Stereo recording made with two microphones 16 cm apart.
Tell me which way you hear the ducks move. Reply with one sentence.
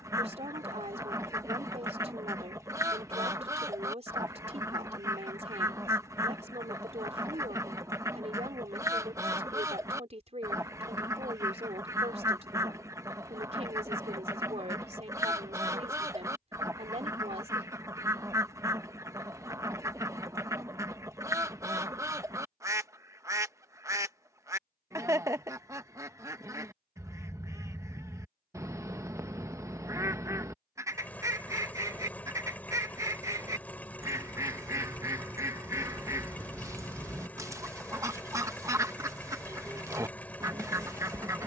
You can hear the ducks stay in one place.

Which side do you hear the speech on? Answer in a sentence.
You can hear the speech on the right.